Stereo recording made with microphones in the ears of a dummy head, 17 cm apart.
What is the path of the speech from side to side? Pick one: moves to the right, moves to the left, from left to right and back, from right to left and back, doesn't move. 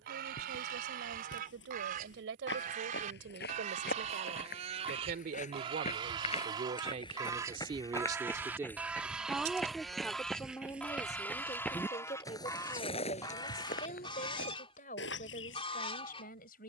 moves to the left.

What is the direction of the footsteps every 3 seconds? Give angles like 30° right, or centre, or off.
70° left, 50° left, 20° left, centre, 40° left, 70° left.